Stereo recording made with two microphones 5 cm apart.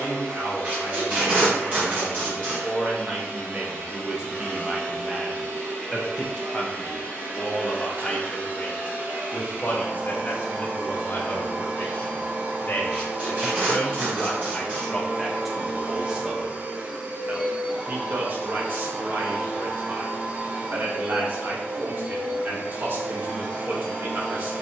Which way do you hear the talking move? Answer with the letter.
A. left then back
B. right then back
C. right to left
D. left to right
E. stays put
A.